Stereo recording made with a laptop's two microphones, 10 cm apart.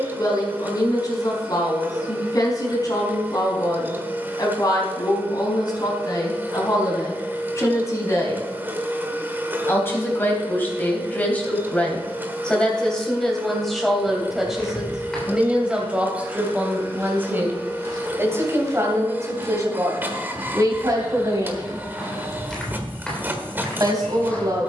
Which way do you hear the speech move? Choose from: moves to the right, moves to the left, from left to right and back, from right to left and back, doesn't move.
moves to the right.